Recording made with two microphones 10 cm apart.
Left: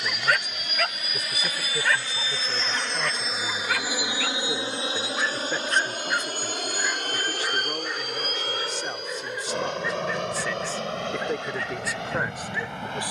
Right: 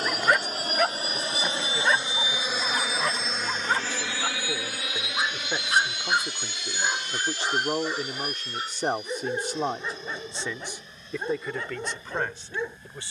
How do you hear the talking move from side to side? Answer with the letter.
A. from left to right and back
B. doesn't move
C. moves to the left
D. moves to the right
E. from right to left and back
A.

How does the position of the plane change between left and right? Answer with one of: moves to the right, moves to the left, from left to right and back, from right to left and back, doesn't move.
moves to the left.